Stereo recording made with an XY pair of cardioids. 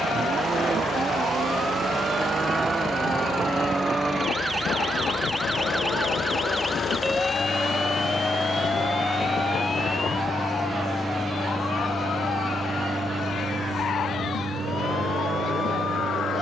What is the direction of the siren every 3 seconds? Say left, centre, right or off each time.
right, right, centre, left, left, left.